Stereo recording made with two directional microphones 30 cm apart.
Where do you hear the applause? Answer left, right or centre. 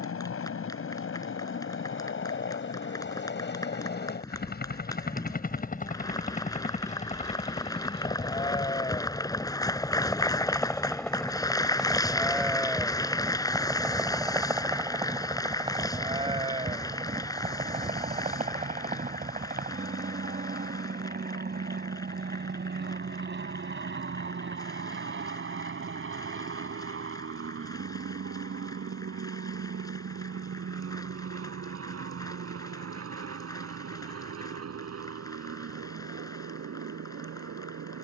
centre.